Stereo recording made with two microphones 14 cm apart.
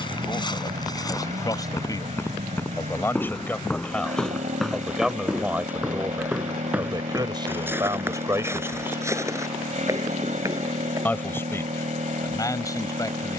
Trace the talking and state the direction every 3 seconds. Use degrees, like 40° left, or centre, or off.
30° left, centre, 20° right, 20° left, 30° left.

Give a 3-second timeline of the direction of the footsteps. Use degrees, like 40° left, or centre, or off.
30° left, centre, 10° right, 20° right, off.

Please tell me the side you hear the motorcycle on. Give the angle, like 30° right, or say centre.
60° right.